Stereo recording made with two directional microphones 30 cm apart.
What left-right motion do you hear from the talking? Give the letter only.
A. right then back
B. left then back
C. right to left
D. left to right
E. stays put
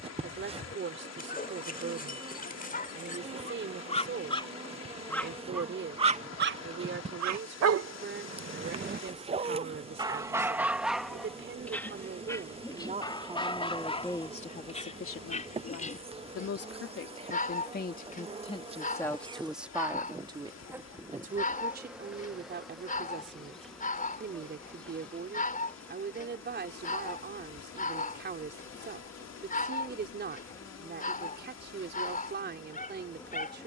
B.